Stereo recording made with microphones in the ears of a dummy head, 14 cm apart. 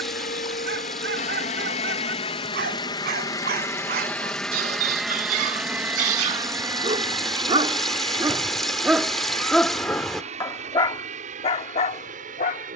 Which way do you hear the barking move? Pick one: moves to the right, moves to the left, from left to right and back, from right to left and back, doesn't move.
moves to the left.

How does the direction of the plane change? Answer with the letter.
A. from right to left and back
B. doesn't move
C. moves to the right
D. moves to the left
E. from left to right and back
C.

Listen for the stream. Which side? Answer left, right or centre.
centre.